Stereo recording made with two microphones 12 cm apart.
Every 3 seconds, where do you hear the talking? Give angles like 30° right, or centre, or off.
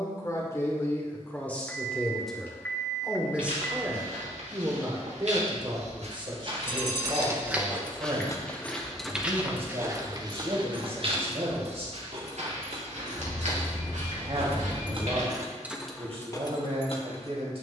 10° left, 20° right, 40° right, 50° right, 50° right, 50° right.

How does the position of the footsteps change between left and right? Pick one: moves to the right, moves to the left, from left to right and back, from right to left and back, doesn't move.
from right to left and back.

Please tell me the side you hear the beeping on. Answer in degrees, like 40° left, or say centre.
20° left.